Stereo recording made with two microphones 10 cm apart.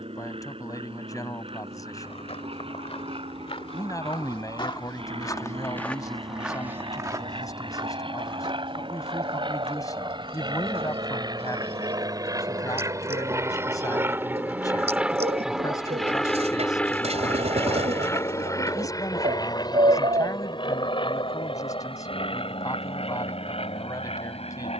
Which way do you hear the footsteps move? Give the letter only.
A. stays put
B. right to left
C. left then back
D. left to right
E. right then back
D.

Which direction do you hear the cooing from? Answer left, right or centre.
right.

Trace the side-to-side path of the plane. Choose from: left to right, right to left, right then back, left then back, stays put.
right to left.